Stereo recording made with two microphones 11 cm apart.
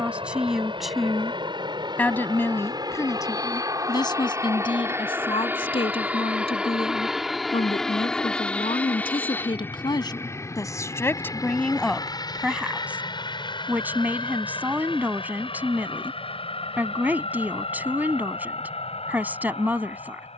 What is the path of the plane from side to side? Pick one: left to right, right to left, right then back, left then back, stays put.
right to left.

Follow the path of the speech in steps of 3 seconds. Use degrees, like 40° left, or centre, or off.
10° left, 50° left, 60° left, 30° left, 10° right, 20° right, 20° right.